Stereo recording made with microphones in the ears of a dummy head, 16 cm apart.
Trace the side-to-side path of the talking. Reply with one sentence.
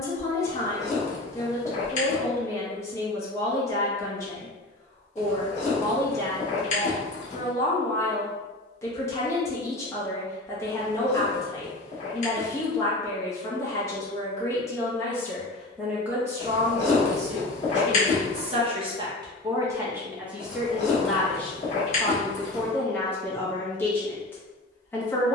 In this clip you hear the talking go right and come back.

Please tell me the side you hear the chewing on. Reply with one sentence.
You can hear the chewing on the left.